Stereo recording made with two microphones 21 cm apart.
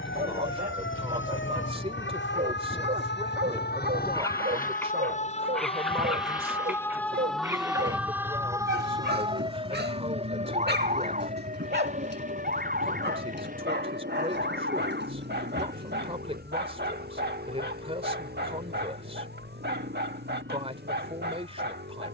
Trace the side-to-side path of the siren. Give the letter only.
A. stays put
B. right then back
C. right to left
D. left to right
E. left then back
D.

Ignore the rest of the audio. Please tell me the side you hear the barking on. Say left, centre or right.
right.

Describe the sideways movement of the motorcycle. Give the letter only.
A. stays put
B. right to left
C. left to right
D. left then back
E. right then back
C.